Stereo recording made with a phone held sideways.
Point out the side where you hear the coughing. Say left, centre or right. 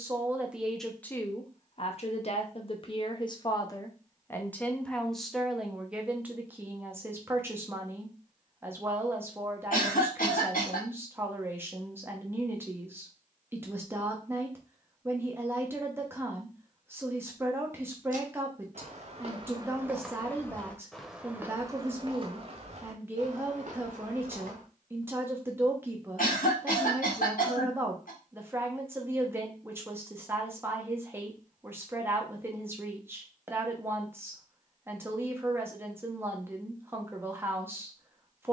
left.